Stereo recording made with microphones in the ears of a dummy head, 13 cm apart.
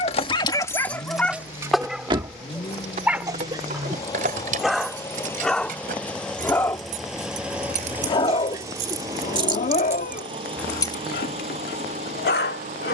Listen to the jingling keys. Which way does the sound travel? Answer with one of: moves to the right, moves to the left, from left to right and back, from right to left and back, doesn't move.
from left to right and back.